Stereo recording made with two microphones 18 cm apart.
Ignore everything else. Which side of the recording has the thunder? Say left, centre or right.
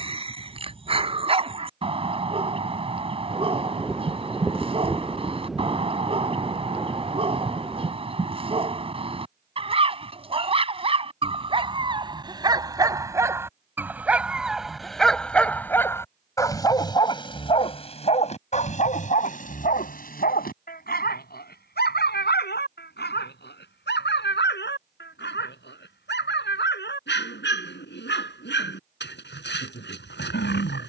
centre.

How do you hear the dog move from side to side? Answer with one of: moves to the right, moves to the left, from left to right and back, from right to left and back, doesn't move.
moves to the left.